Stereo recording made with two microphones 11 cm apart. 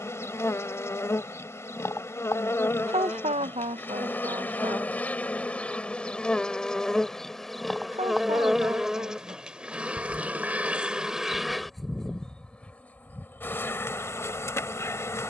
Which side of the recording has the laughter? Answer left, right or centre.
right.